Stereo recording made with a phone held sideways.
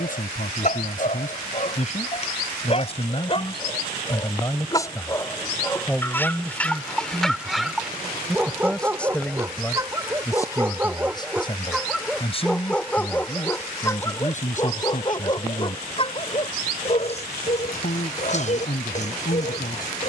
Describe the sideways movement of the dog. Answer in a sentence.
In this clip you hear the dog move from left to right and back again.